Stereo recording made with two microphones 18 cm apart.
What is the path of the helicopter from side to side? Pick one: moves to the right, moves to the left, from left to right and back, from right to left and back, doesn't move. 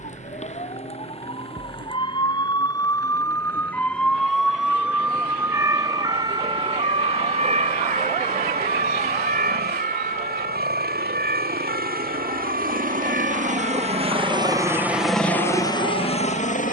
moves to the left.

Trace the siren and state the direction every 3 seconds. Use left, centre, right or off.
left, centre, right, right, right, right.